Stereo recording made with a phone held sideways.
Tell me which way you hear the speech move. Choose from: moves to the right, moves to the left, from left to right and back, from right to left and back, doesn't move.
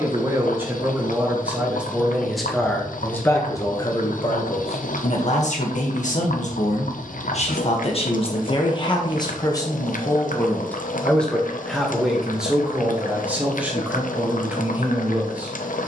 from right to left and back.